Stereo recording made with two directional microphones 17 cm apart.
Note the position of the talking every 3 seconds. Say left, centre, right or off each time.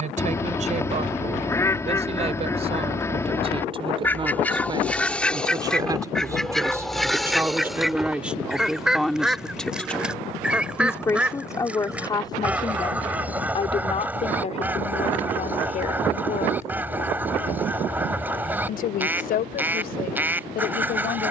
right, right, centre, centre, left, left, left.